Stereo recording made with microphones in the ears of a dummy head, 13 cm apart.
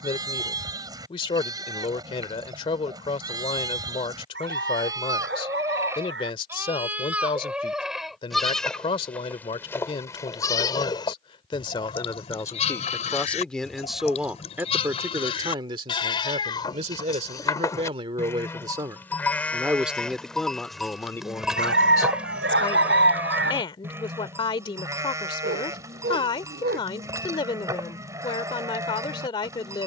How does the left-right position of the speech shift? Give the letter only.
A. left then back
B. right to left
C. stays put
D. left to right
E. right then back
E.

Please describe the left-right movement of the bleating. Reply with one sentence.
You can hear the bleating go left and come back.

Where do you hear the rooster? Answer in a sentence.
In this clip you hear the rooster on the right.